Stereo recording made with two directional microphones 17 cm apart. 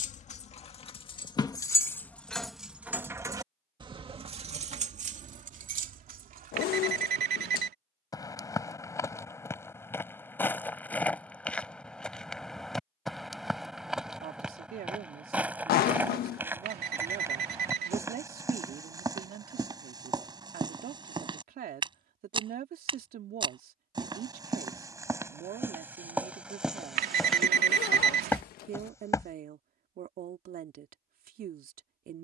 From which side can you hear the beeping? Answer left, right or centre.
right.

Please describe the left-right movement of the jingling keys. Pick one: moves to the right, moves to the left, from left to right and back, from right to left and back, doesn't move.
moves to the right.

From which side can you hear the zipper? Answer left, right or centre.
left.